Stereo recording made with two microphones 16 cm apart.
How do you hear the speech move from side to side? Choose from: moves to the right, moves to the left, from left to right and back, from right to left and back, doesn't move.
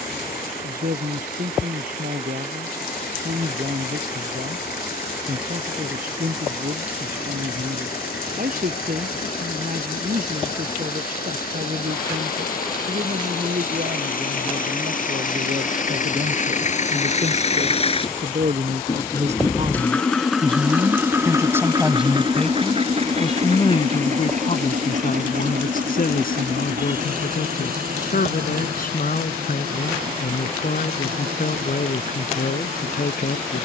moves to the left.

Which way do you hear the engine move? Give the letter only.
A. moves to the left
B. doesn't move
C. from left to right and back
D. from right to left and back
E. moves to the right
E.